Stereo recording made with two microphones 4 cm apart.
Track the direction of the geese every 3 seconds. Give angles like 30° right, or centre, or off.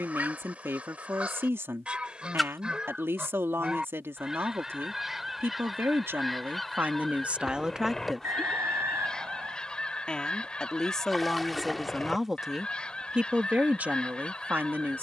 30° right, 10° right, 10° left, 20° left, 20° left.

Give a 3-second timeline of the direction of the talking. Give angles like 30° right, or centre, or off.
70° right, 70° right, 40° right, 10° left, 30° right.